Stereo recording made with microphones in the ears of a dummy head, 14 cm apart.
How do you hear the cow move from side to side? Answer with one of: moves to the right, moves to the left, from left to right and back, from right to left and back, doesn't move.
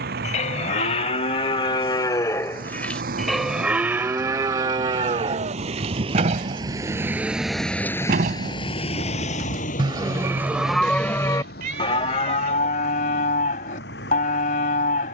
from left to right and back.